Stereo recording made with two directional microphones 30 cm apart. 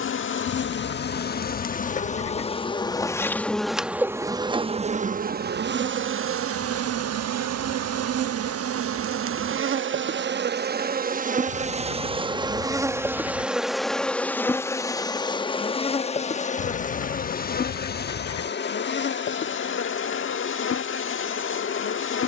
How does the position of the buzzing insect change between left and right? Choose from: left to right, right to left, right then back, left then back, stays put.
right then back.